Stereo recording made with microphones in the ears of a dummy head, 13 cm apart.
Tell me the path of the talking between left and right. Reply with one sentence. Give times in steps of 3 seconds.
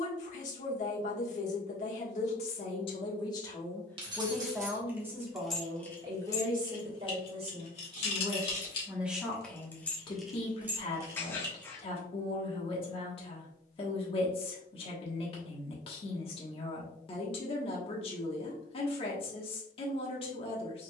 You can hear the talking on the left from 0 s, in the centre from 3 s, on the right from 6 s and on the left from 9 s.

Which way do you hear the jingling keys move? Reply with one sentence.
In this clip you hear the jingling keys go left and come back.